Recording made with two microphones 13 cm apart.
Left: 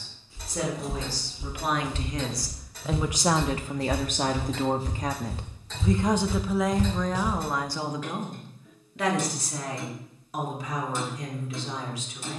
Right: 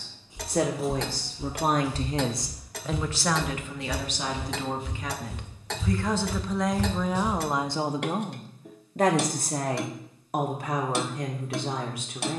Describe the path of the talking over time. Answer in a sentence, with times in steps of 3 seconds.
In this clip you hear the talking on the right from 0 s, on the left from 3 s, in the centre from 6 s and on the right from 9 s.